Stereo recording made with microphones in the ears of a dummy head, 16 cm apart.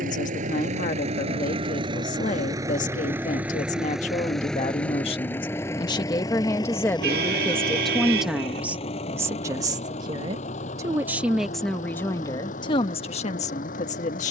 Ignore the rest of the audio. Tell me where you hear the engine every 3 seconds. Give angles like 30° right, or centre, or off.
30° right, centre, 30° left, 40° left, 50° left.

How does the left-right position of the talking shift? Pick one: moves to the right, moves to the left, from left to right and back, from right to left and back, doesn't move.
from left to right and back.